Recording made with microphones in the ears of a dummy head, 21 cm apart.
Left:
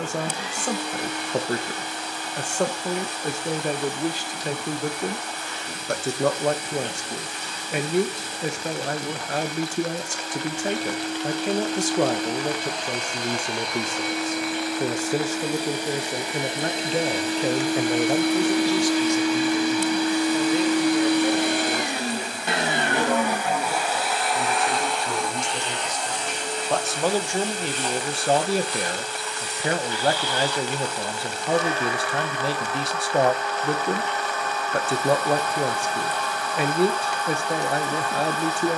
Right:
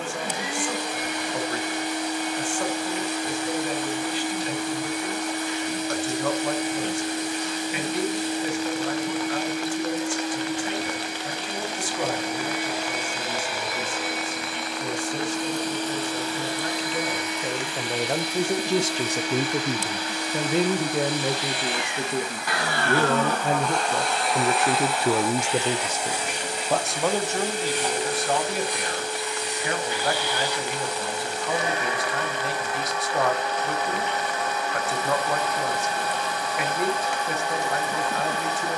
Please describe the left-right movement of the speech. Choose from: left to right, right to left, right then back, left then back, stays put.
right then back.